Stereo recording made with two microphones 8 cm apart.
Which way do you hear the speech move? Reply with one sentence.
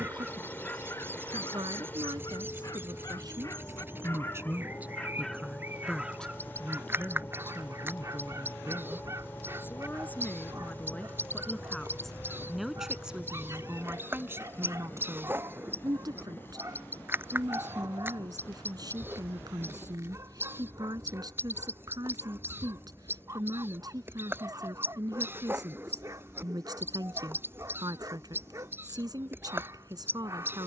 You can hear the speech go left and come back.